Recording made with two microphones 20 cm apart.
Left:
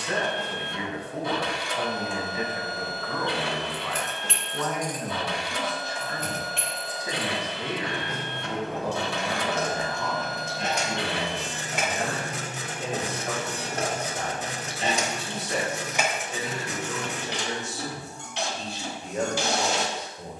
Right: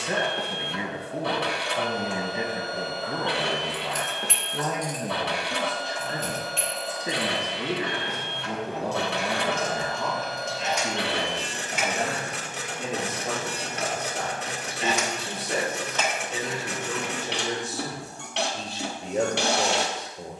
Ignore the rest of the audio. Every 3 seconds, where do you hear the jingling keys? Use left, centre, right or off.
off, left, left, left, left, centre, off.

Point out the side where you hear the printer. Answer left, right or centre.
right.